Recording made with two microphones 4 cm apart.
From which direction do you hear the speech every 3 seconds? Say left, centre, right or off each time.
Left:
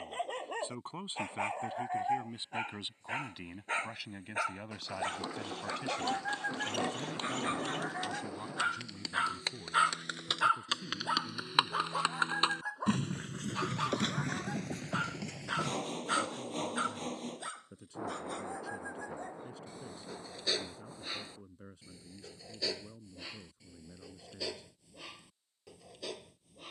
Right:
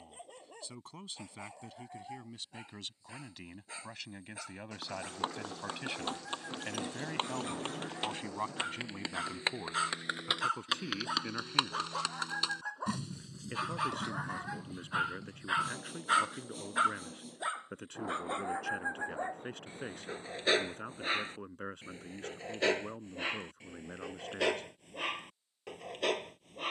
left, centre, right, right, right, right, right, right, right.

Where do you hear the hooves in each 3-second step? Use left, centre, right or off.
off, right, right, centre, left, left, off, off, off.